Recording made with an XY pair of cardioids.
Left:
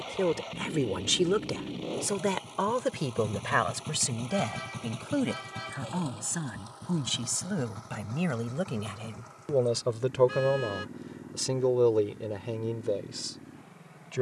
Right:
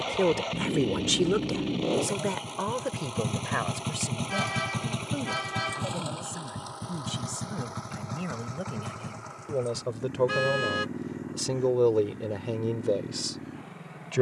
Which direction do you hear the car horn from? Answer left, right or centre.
right.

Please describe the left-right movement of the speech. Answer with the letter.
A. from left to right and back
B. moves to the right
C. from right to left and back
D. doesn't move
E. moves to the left
C.